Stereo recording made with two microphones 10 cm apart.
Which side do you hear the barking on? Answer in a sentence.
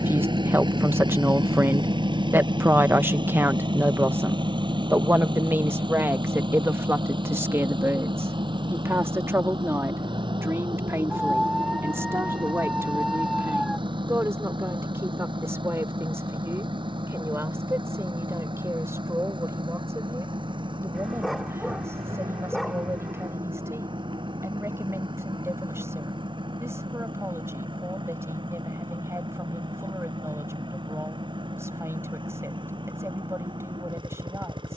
In this clip you hear the barking in the centre.